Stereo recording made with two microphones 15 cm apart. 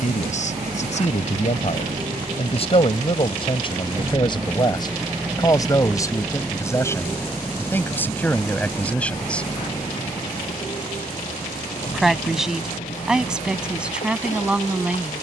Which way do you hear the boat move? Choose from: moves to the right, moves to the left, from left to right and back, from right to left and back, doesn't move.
moves to the left.